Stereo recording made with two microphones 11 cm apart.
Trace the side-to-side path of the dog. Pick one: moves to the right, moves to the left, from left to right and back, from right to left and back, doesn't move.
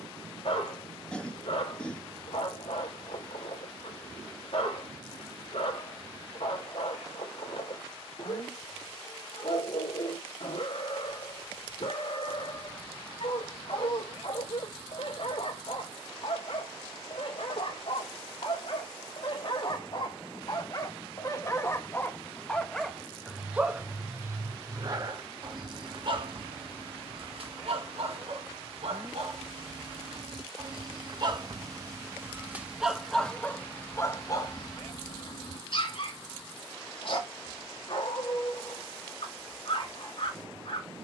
from left to right and back.